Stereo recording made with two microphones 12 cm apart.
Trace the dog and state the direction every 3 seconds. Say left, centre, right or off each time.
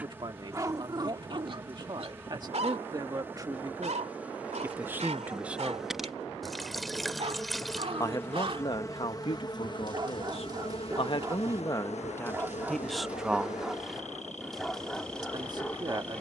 right, right, right, right, centre, centre.